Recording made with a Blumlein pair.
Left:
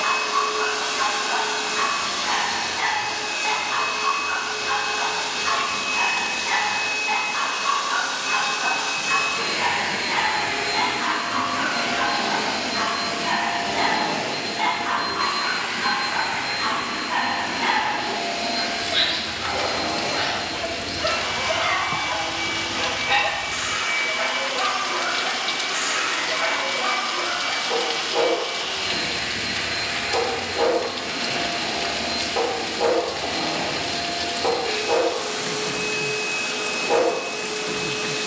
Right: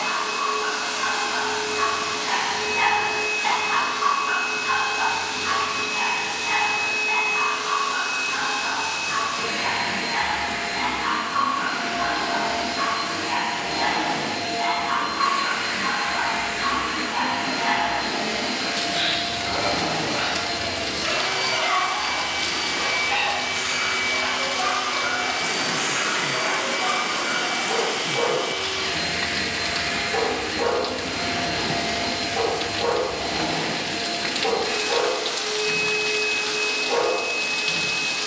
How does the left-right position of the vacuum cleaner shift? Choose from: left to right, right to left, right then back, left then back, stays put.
left to right.